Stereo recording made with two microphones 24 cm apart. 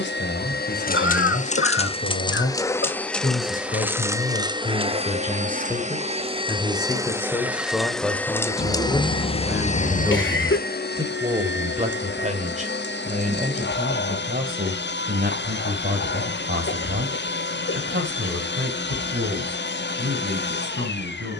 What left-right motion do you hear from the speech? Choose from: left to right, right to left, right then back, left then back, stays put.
left to right.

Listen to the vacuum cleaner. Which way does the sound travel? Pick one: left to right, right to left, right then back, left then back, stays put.
right then back.